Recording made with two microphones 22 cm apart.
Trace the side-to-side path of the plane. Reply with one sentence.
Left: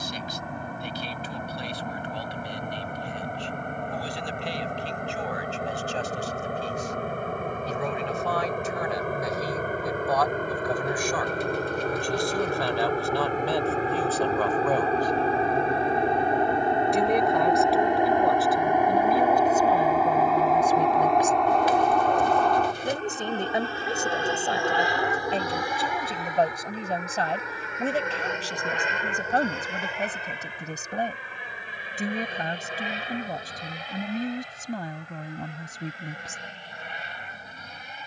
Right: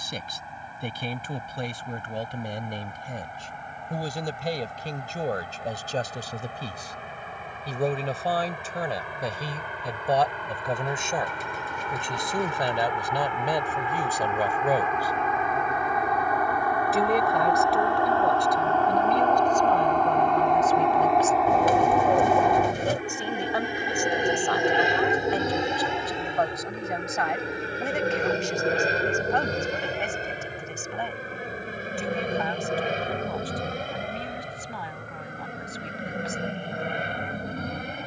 In this clip you hear the plane travel towards the right.